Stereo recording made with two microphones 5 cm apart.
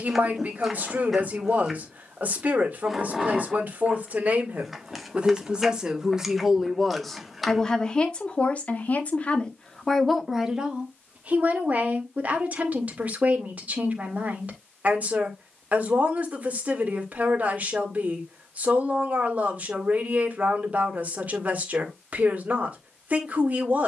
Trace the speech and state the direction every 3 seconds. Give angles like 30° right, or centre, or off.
40° right, 30° right, 10° left, 10° right, 30° right, 30° right, 30° right, 30° right.